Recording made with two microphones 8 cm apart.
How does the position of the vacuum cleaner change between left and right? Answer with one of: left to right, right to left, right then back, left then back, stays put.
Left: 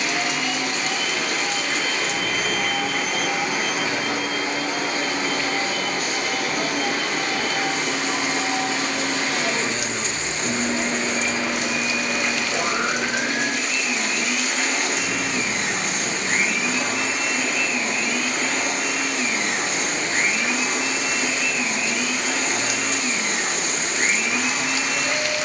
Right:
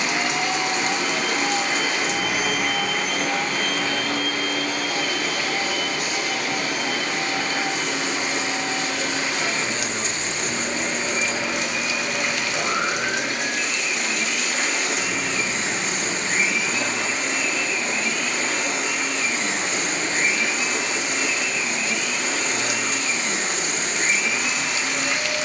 right to left.